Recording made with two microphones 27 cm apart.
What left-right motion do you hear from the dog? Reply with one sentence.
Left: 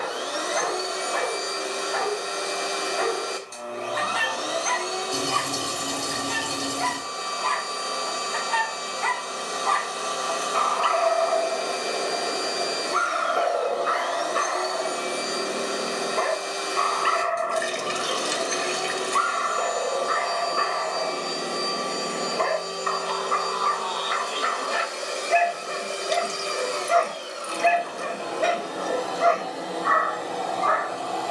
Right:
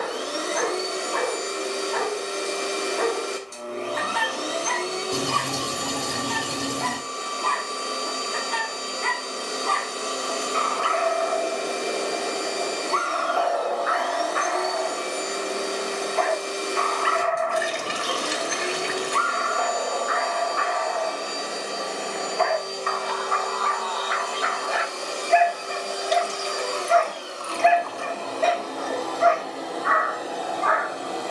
In this clip you hear the dog travel towards the left.